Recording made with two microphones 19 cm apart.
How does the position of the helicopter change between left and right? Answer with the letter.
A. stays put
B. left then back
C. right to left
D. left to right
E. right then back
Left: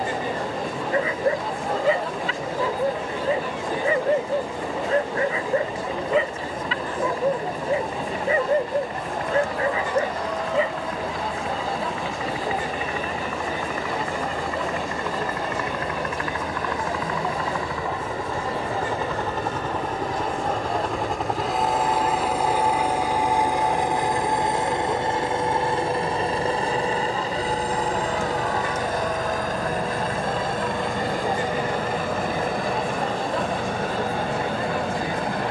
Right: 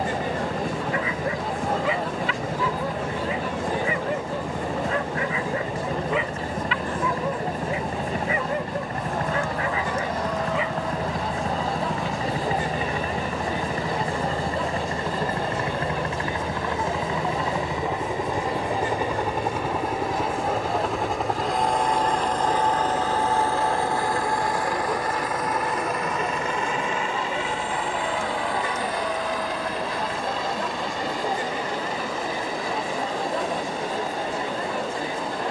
C.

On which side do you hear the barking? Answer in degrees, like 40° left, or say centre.
40° left.